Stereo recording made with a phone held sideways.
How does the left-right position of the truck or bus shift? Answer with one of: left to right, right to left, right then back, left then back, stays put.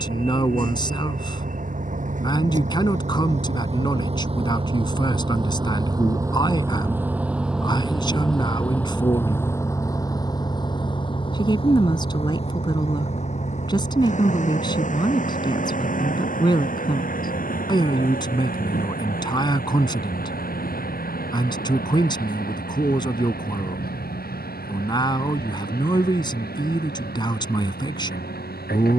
right to left.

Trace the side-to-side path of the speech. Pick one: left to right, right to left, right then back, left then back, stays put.
stays put.